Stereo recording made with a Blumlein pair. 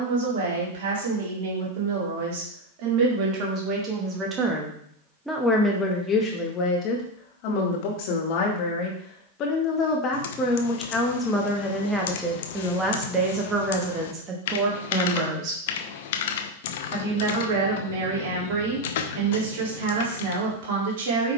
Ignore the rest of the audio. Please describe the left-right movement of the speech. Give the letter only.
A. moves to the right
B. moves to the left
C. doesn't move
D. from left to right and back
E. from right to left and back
E.